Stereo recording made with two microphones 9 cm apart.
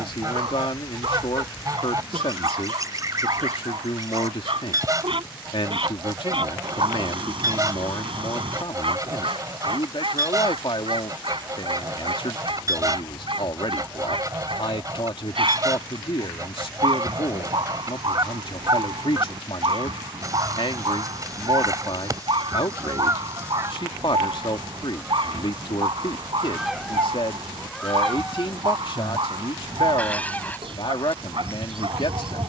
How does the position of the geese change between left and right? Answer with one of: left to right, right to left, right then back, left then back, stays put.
right to left.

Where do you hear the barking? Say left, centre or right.
right.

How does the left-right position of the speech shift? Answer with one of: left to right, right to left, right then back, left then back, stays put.
stays put.